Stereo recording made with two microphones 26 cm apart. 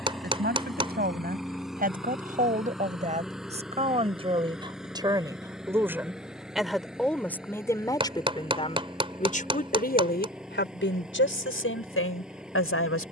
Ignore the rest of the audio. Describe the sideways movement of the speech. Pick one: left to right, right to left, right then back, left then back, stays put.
right to left.